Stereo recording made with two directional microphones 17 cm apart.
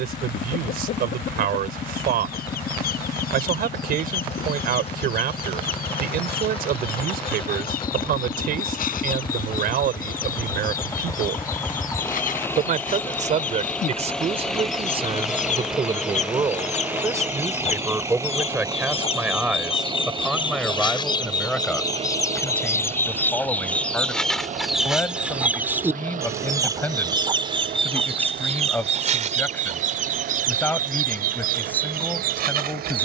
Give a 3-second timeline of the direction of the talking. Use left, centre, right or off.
right, right, right, right, right, right, centre, centre, centre, centre, centre.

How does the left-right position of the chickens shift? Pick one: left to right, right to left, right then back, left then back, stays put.
left to right.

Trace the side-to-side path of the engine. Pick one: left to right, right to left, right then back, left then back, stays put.
left to right.